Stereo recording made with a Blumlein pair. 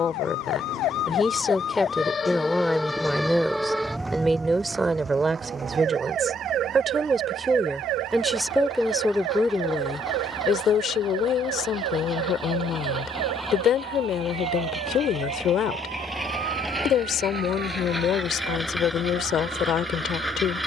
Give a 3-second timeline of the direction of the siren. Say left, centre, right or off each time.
left, centre, right, right, right, right, right.